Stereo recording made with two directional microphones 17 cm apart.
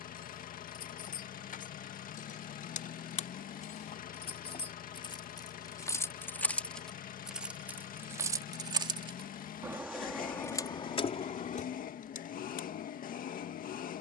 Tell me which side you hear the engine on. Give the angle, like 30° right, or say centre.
60° left.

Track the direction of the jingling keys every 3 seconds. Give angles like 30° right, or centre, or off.
50° left, 30° left, 10° right, 20° left, 60° left.